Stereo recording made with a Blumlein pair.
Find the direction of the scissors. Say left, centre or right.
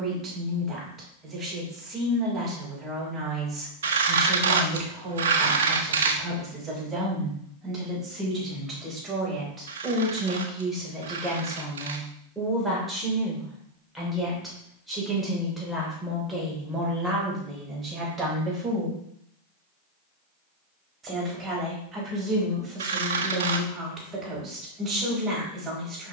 right.